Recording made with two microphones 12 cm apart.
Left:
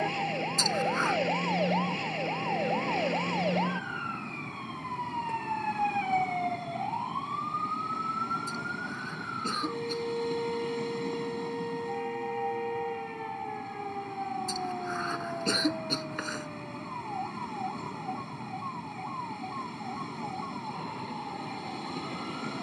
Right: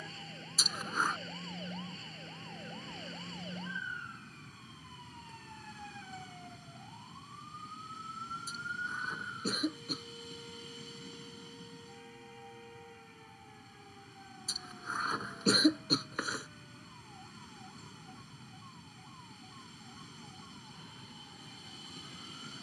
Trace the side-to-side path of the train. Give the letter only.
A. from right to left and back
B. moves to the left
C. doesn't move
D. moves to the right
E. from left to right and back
C.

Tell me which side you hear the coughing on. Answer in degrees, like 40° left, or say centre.
centre.